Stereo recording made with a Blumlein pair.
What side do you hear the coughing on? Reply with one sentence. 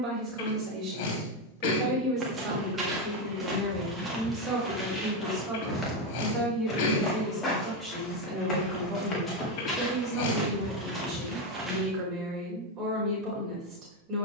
You can hear the coughing on the left.